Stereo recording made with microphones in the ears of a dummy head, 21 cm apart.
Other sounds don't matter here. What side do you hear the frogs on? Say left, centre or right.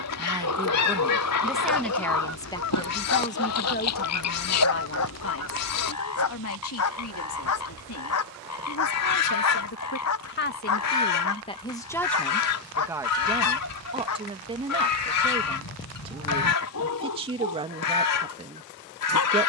left.